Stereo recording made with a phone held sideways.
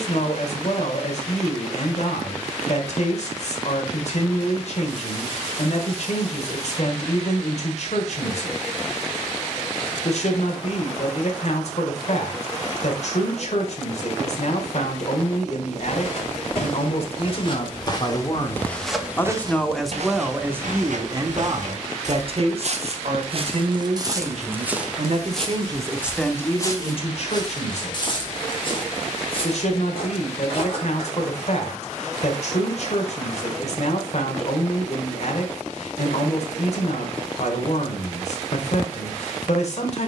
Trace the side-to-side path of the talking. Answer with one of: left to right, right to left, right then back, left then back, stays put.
right then back.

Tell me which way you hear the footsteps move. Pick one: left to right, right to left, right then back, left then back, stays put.
right then back.